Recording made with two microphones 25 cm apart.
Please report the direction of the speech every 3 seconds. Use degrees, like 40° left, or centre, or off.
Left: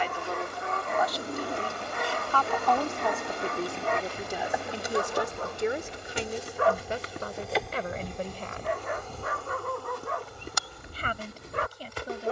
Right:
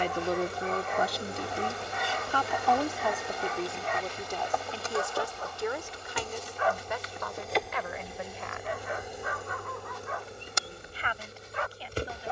30° right, 10° left, 40° left, 50° left.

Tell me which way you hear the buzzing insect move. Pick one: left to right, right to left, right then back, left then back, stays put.
left then back.